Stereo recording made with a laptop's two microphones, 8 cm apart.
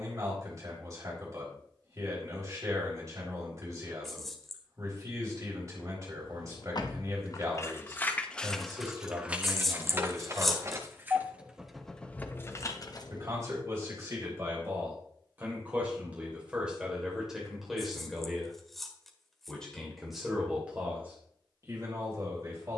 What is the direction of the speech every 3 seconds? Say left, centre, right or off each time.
right, right, right, right, right, centre, centre, right.